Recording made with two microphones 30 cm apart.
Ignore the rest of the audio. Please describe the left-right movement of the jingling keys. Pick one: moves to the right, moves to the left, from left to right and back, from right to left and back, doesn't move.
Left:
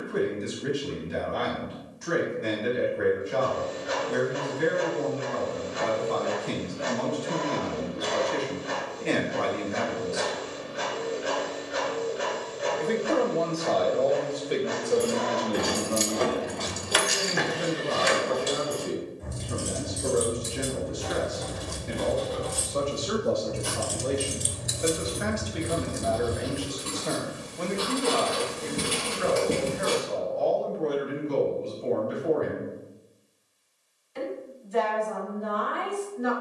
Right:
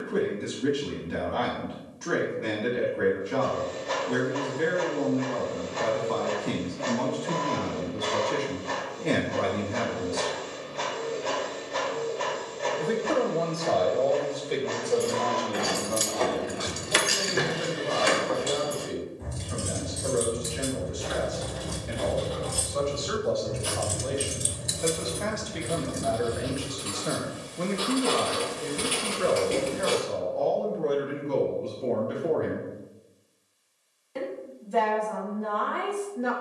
from left to right and back.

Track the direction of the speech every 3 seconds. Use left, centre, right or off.
right, right, right, right, centre, left, left, left, centre, right, right, right.